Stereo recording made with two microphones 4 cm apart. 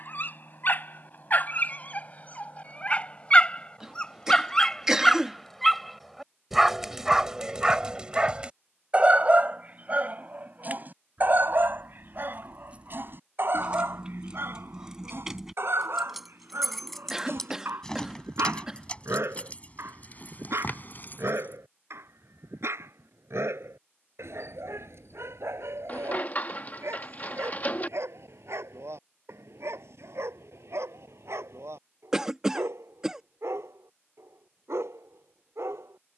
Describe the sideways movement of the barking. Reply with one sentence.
In this clip you hear the barking move to the right.